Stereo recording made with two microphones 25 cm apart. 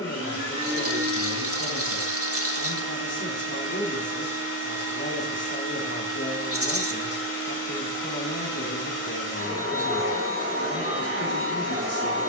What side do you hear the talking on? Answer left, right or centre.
left.